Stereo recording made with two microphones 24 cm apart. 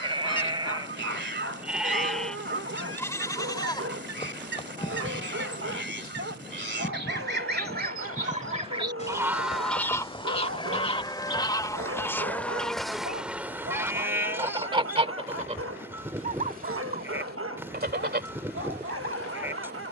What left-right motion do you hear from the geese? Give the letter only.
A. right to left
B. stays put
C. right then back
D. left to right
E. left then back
E.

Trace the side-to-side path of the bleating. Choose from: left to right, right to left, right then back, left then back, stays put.
left then back.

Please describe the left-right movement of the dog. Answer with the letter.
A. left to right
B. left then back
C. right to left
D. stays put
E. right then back
D.